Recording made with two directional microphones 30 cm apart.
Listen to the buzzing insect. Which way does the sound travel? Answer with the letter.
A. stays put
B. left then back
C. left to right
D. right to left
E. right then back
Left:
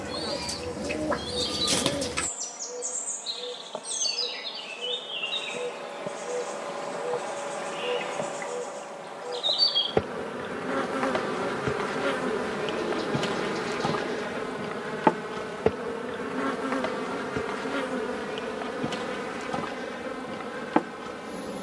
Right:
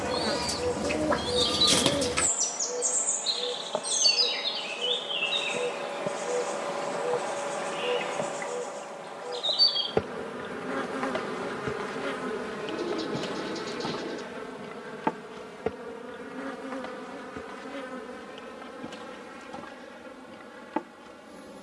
D.